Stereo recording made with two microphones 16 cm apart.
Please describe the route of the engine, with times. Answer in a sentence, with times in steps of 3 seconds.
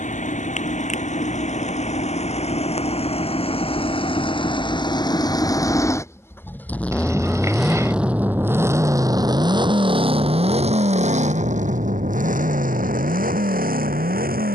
In this clip you hear the engine on the left from 0 s, in the centre from 6 s and on the right from 9 s.